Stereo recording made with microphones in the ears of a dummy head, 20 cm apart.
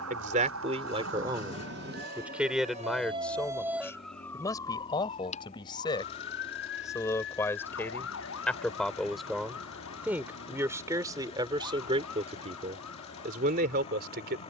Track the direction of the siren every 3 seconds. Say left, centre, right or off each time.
right, centre, left, left, left.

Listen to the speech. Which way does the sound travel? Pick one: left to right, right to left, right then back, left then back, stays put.
left then back.